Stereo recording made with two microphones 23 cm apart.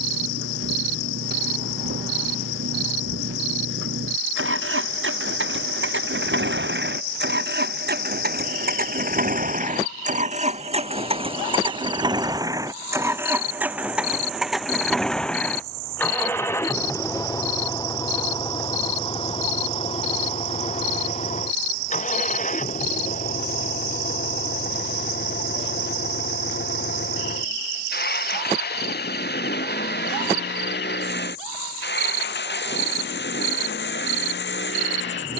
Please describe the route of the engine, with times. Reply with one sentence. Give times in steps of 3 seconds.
You can hear the engine on the right from 0 s, in the centre from 12 s and on the left from 18 s.